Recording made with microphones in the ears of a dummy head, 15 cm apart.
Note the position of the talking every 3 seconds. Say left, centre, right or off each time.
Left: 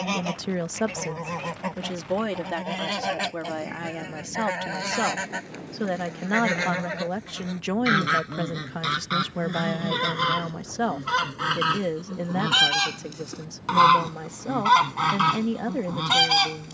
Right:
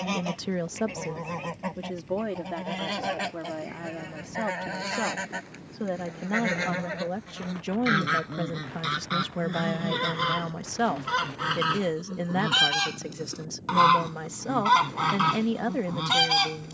left, left, left, centre, right, right.